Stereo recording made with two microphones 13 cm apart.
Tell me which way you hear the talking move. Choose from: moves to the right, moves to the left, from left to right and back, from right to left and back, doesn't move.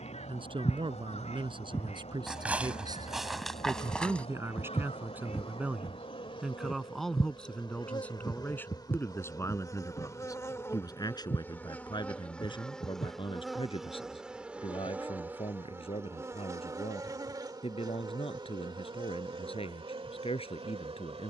moves to the left.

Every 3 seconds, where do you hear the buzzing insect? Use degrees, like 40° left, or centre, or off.
50° left, 50° left, 40° left, 20° left, centre, 20° right, 40° right.